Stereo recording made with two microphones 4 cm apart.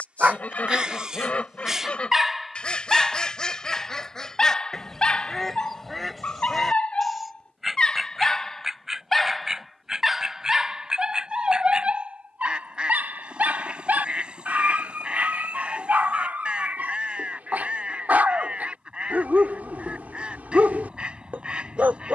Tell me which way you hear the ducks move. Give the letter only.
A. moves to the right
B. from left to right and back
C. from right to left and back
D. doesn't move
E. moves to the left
A.